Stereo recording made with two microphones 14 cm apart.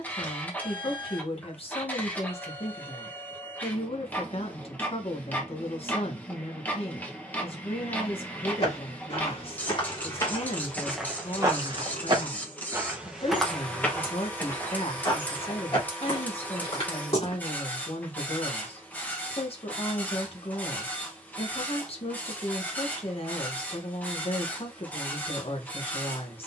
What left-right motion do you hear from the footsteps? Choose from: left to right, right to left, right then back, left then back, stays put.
right then back.